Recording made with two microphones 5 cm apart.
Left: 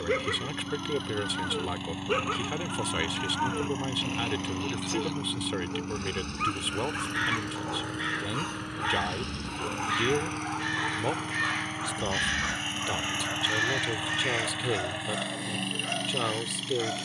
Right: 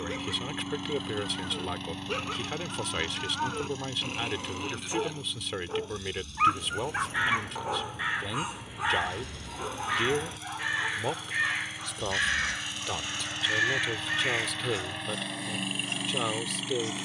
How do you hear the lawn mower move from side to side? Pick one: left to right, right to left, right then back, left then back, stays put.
left then back.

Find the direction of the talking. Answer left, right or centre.
centre.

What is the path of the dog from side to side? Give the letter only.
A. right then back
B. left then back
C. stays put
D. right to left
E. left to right
A.